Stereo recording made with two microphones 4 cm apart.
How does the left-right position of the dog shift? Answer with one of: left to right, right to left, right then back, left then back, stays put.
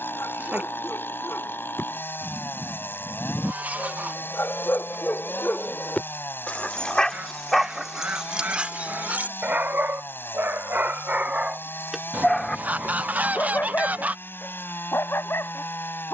right then back.